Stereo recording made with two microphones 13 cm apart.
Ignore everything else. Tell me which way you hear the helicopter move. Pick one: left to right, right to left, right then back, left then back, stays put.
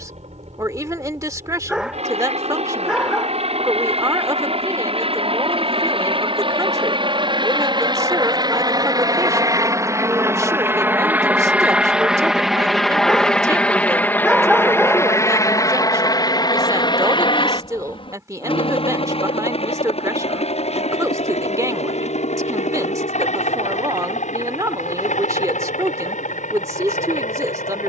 right to left.